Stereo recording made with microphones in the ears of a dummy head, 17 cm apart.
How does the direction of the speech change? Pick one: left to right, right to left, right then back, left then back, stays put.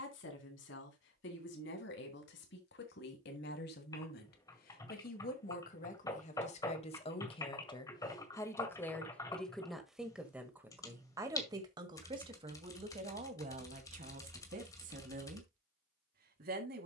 left to right.